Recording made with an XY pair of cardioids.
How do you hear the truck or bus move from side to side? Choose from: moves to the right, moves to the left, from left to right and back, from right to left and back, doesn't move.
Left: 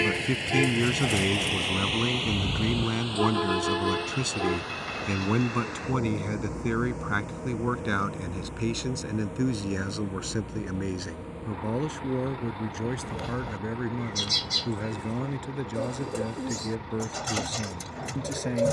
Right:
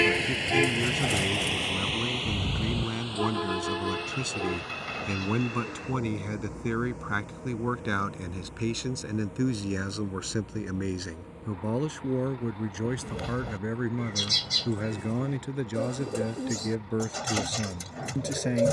moves to the left.